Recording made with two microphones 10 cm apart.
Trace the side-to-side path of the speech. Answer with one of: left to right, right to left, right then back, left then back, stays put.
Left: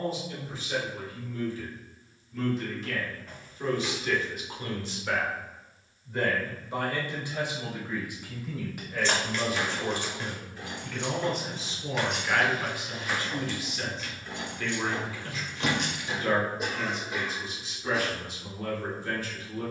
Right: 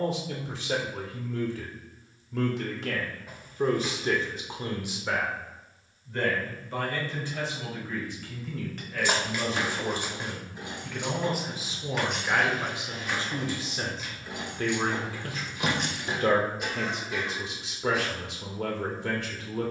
left then back.